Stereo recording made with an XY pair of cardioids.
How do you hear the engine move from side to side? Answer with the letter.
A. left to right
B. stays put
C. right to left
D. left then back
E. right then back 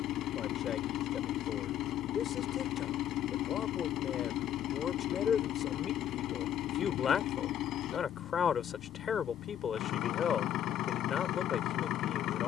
B.